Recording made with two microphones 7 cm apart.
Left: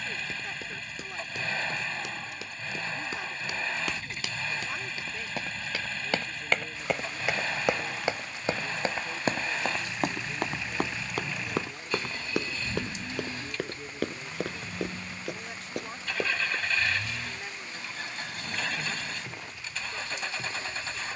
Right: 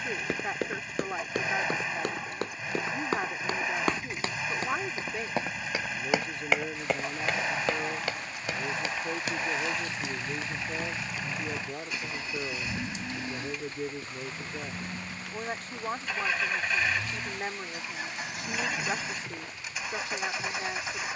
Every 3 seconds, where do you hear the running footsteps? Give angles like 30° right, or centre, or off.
60° right, 40° right, 10° left, 50° left, 70° left, 80° left, off.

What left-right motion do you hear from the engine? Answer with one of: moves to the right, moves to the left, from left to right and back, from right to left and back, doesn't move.
doesn't move.